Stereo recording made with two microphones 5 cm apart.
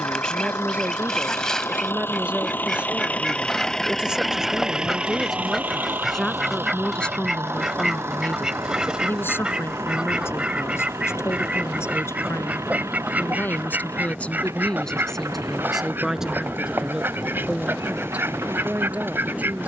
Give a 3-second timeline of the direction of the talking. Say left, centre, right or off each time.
right, centre, left, left, left, centre, right.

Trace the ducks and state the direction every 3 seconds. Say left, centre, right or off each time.
centre, centre, centre, right, right, right, right.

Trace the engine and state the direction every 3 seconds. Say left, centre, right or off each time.
left, centre, right, right, right, right, right.